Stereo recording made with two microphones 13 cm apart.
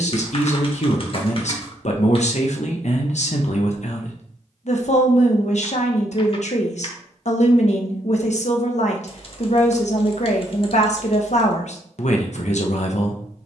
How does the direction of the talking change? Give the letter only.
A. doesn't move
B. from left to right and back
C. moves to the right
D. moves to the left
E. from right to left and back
A.